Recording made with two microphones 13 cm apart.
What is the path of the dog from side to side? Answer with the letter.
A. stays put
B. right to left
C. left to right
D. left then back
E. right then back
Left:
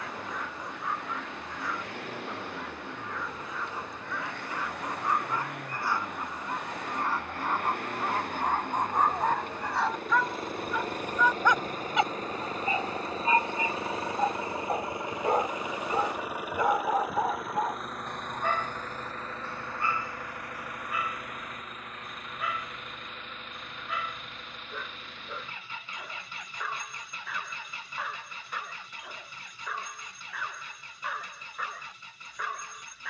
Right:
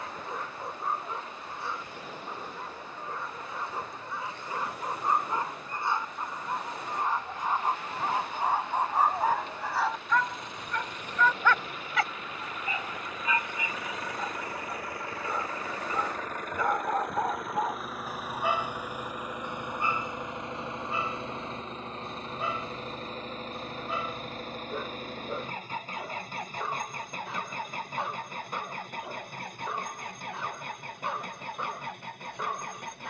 D.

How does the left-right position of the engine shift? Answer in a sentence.
In this clip you hear the engine move from left to right.